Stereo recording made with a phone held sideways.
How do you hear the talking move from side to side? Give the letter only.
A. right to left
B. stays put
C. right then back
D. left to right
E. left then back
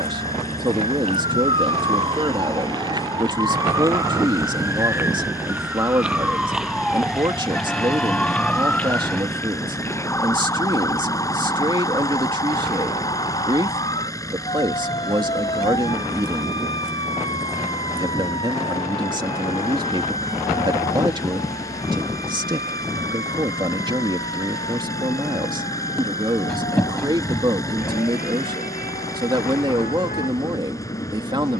B.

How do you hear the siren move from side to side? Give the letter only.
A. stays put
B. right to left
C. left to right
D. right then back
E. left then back
B.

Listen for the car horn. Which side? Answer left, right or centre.
centre.